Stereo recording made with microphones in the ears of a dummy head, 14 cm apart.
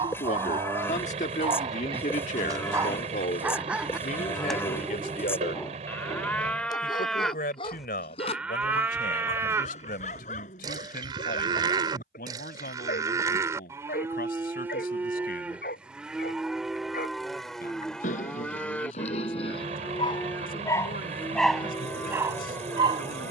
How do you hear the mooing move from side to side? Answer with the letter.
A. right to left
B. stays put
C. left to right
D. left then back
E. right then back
E.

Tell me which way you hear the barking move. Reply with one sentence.
You can hear the barking move from right to left and back again.